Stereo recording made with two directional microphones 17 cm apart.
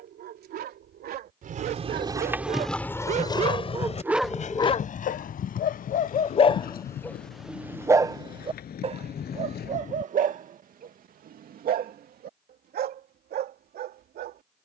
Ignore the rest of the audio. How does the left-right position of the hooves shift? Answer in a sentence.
In this clip you hear the hooves move from right to left.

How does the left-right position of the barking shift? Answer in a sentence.
You can hear the barking move from right to left and back again.